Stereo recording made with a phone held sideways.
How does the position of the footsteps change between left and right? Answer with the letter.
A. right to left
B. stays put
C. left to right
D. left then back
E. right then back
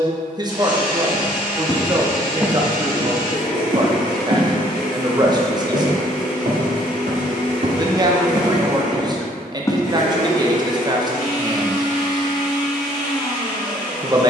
E.